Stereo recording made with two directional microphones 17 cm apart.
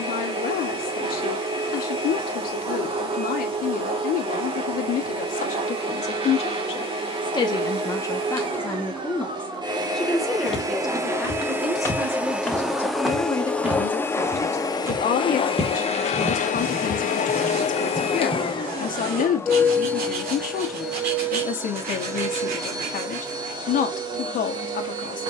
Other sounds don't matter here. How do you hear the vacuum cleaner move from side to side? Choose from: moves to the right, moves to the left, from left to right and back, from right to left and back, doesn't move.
from right to left and back.